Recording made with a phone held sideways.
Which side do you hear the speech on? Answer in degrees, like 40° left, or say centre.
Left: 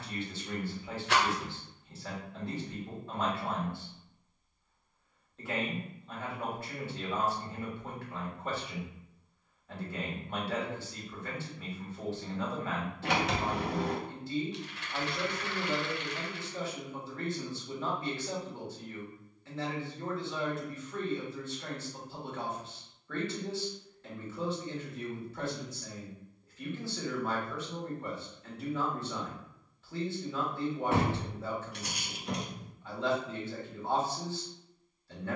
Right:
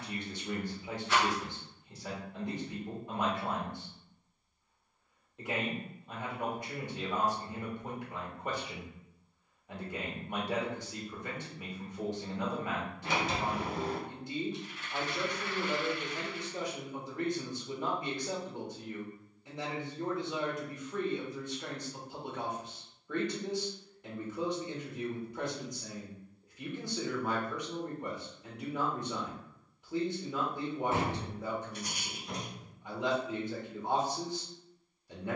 20° right.